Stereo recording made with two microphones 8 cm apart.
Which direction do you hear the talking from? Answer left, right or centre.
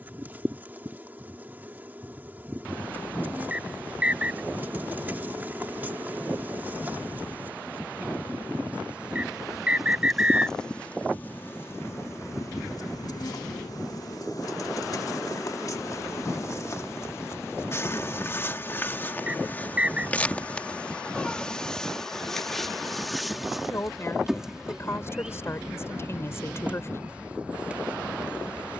left.